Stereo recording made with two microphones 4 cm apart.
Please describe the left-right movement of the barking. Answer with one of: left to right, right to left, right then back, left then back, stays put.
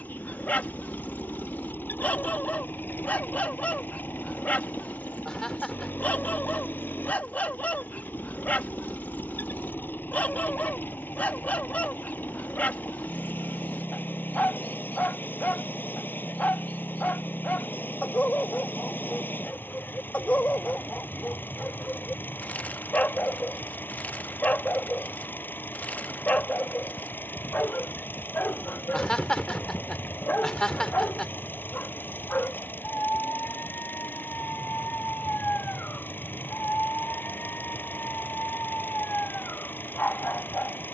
stays put.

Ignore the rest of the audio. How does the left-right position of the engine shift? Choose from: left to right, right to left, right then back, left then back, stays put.
stays put.